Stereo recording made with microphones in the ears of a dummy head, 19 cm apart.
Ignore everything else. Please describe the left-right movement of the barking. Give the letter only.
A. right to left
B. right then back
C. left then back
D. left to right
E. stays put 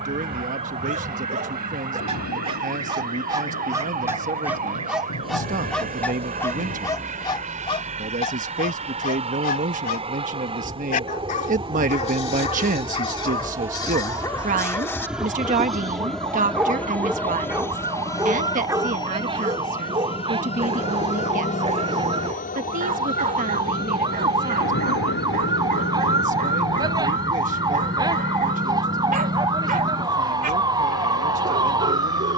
C.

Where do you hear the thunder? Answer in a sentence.
In this clip you hear the thunder on the left.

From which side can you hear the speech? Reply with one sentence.
You can hear the speech on the right.